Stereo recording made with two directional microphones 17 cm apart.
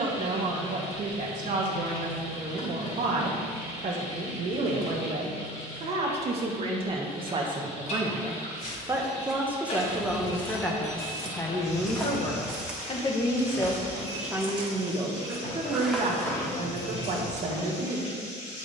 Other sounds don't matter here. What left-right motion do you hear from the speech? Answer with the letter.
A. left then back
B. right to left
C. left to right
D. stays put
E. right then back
A.